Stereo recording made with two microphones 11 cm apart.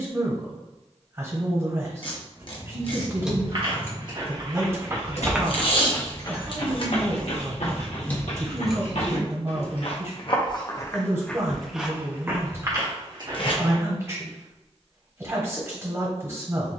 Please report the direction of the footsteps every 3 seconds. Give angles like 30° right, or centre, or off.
off, 20° right, 60° left, 30° left, 30° right, off.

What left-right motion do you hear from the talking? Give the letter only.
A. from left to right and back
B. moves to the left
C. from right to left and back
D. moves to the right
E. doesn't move
E.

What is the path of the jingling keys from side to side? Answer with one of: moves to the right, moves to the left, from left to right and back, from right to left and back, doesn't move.
from right to left and back.